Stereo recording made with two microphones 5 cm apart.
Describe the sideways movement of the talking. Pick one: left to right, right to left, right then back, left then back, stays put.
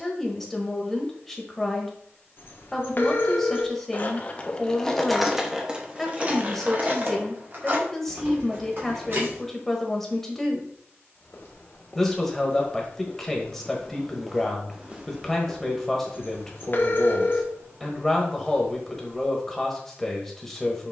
stays put.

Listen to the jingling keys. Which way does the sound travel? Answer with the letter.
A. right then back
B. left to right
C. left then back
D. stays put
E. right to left
B.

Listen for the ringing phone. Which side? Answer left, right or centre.
left.